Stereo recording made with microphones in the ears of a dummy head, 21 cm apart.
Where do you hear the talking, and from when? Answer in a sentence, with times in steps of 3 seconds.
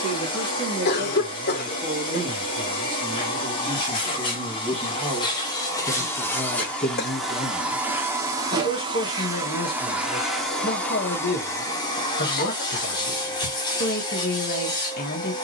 In this clip you hear the talking on the right from 0 s, in the centre from 3 s and on the left from 6 s.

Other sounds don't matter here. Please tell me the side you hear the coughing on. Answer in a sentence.
In this clip you hear the coughing on the left.